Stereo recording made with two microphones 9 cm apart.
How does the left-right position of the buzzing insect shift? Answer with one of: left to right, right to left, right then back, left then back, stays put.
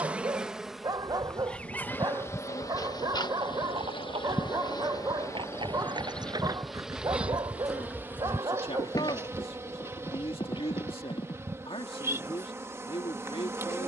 left then back.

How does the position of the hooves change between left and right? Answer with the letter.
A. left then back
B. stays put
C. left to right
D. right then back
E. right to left
E.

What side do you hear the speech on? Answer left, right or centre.
left.